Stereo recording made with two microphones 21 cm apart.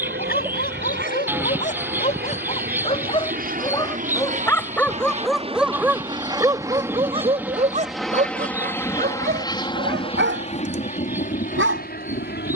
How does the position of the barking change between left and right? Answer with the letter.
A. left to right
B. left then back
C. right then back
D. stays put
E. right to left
A.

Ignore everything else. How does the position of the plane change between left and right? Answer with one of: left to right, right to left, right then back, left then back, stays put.
right to left.